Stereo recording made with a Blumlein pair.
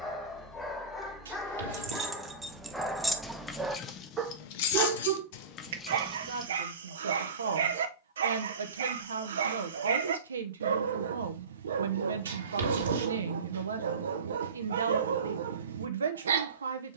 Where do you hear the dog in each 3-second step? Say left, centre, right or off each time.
centre, right, right, right, right, right.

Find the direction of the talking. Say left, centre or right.
right.